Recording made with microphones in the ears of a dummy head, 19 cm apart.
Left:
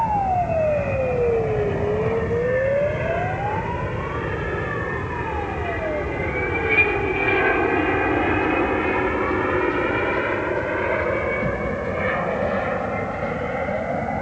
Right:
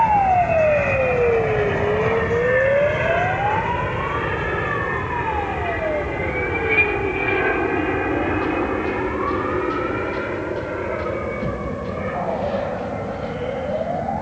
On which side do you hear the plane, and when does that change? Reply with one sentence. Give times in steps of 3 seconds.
You can hear the plane on the right from 0 s, in the centre from 6 s and on the left from 9 s.